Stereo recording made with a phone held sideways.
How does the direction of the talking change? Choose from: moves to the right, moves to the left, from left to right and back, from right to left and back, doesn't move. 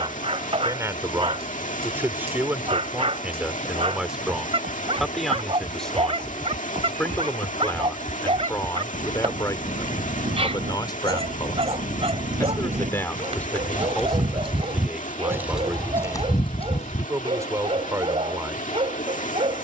from right to left and back.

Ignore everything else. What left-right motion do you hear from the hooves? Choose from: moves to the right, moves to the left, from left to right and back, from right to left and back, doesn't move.
moves to the left.